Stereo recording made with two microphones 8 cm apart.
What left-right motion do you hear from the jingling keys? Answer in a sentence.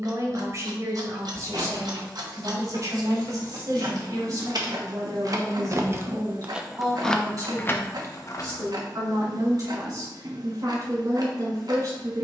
You can hear the jingling keys go from the right side to the left.